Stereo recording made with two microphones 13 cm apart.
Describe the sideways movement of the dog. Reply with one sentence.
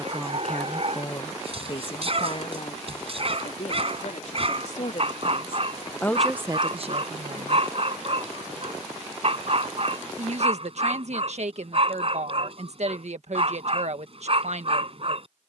In this clip you hear the dog stay put.